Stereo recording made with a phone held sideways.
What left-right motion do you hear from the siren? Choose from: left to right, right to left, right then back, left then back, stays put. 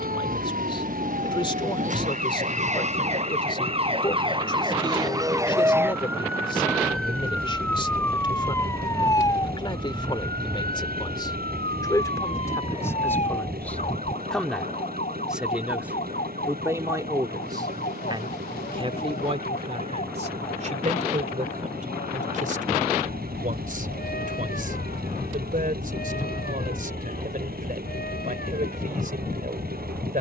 right to left.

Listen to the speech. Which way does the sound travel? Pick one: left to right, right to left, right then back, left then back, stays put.
left to right.